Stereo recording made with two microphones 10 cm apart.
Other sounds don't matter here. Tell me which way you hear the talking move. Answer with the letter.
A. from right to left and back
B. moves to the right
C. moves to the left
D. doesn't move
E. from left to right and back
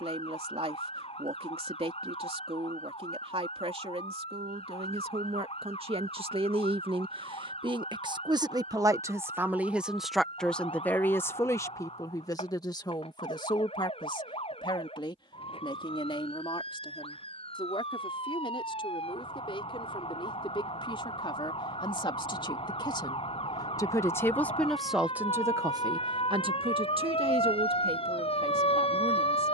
A.